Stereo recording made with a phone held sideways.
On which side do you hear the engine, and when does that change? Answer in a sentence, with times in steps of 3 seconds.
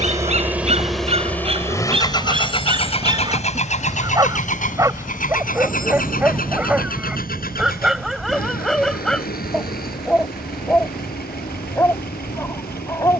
You can hear the engine in the centre from 0 s and on the left from 3 s.